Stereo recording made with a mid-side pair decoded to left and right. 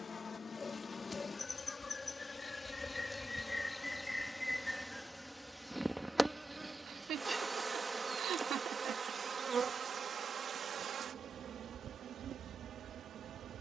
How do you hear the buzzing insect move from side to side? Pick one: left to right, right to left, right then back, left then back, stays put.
left to right.